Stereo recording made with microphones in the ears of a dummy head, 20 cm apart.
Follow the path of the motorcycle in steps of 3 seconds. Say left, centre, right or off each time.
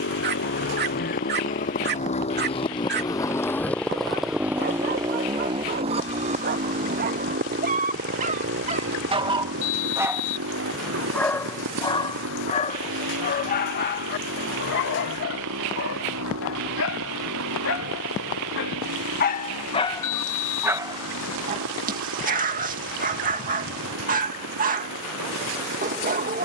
left, centre, right, right, right, right, right, right, right.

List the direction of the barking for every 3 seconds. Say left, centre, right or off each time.
right, right, right, centre, left, left, left, right, right.